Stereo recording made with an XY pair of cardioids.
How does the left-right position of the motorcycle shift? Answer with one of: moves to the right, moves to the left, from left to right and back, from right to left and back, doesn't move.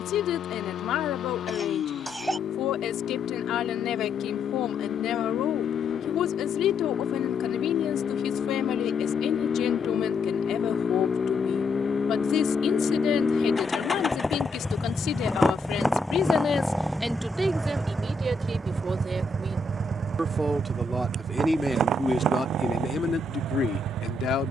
moves to the right.